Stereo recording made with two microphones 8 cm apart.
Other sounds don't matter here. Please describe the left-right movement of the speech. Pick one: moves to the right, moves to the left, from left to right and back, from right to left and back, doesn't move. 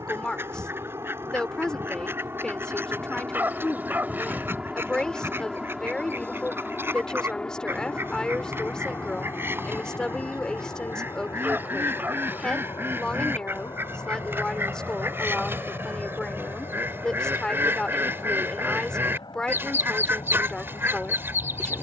doesn't move.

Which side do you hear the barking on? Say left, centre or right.
right.